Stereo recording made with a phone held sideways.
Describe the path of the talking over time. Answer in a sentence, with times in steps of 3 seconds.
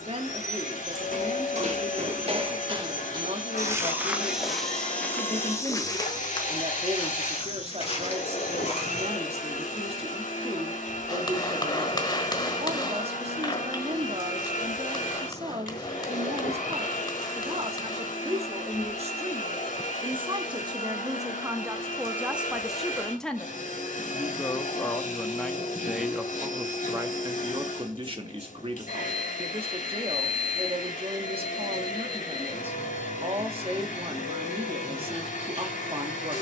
You can hear the talking on the right from 0 s, in the centre from 21 s and on the right from 27 s.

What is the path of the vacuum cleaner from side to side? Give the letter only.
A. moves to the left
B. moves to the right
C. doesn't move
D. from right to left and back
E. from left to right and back
C.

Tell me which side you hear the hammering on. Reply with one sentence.
You can hear the hammering on the left.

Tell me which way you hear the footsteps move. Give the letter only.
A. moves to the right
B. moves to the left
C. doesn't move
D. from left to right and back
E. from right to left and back
B.